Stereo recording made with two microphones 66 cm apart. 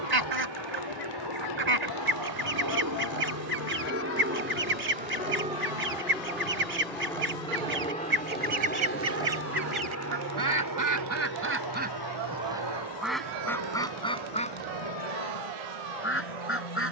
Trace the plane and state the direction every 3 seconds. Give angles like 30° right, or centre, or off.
30° right, 20° right, 10° left, 20° left, 40° left, 40° left.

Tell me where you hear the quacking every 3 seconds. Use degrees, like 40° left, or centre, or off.
70° right, 70° right, 60° right, 30° right, centre, 20° left.